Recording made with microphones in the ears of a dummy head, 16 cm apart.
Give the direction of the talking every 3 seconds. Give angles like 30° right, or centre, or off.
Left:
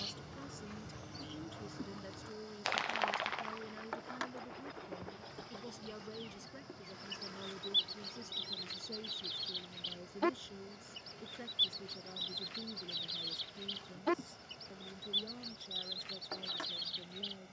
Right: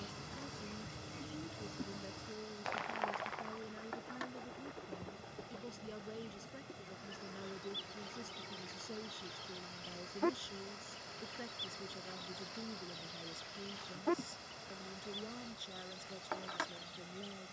30° left, 20° left, centre, 10° right, 20° right, 20° right.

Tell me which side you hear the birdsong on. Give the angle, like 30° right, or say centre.
70° left.